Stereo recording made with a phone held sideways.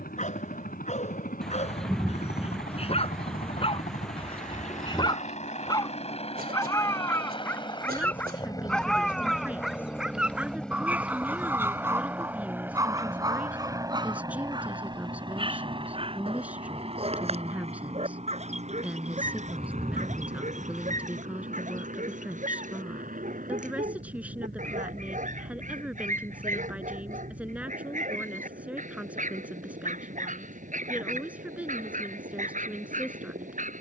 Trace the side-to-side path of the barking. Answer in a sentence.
In this clip you hear the barking move to the right.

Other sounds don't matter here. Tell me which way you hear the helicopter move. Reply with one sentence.
In this clip you hear the helicopter go from the left side to the right.